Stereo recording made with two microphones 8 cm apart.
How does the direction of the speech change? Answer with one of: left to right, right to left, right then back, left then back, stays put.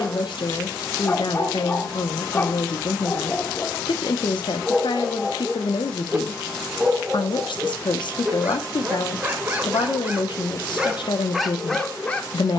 stays put.